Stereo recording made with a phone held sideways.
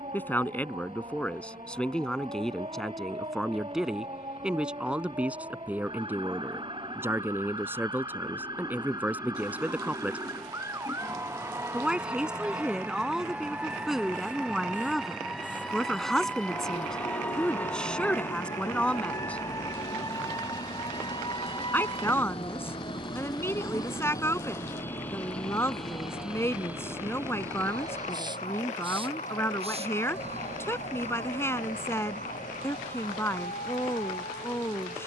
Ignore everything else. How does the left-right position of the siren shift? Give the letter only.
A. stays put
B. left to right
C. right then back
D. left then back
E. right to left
E.